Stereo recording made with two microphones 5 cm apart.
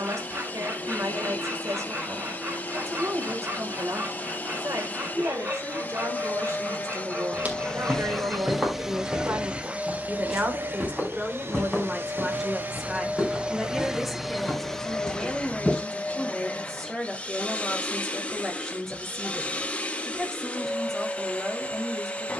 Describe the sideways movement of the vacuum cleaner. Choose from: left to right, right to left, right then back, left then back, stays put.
right then back.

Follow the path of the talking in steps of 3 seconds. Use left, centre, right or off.
right, right, right, right, centre, centre, centre, centre.